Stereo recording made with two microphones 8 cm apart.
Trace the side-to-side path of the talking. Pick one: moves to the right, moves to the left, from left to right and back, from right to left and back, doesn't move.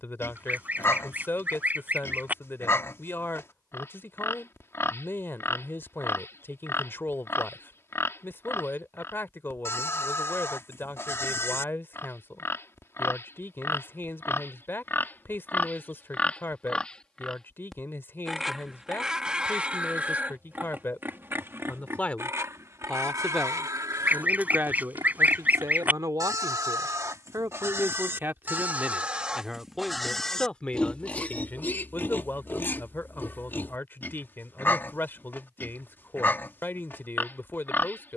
from left to right and back.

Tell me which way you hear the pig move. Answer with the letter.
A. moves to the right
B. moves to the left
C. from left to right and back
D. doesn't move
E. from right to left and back
C.